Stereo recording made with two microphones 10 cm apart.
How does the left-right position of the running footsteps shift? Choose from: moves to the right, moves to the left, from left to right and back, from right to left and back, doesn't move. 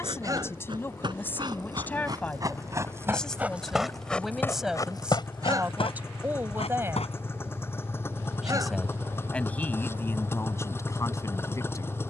moves to the left.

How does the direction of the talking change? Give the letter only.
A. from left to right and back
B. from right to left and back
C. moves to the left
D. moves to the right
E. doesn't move
A.